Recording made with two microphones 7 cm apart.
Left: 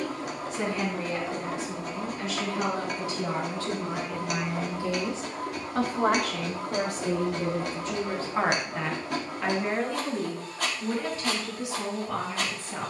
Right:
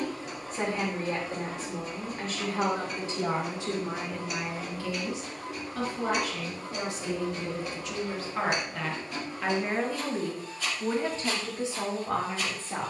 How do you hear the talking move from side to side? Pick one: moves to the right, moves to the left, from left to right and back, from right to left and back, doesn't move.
from right to left and back.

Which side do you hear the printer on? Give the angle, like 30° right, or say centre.
70° left.